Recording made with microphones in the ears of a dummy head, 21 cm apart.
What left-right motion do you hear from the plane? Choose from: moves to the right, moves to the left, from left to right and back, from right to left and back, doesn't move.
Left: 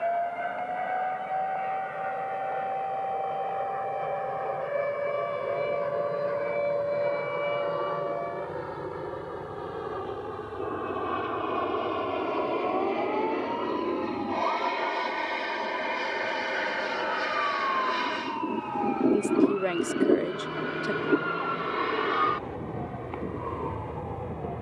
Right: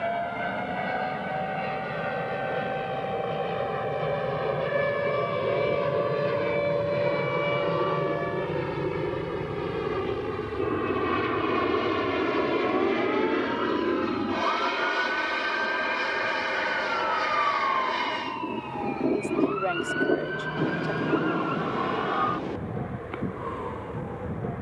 moves to the left.